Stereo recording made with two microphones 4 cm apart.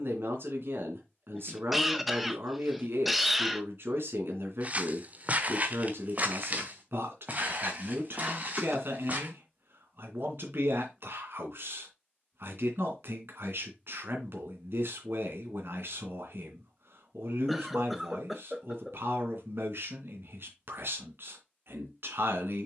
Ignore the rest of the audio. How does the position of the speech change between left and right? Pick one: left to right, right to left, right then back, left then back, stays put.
stays put.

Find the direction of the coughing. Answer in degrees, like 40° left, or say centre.
centre.